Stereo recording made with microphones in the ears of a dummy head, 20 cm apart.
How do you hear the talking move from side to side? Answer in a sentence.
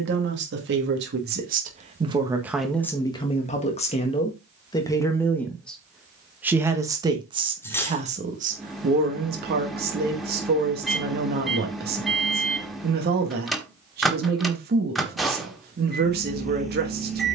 You can hear the talking move from right to left and back again.